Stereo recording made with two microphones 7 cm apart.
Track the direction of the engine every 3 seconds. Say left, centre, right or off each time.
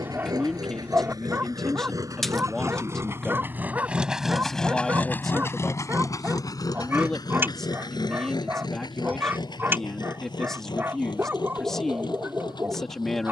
right, centre, left, left, left.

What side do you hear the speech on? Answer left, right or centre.
centre.